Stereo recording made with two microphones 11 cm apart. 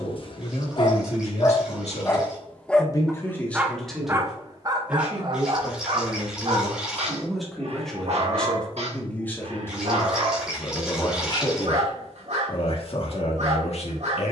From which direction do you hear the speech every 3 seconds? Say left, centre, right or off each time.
left, centre, centre, left, left.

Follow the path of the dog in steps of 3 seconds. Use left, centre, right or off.
left, right, right, right, right.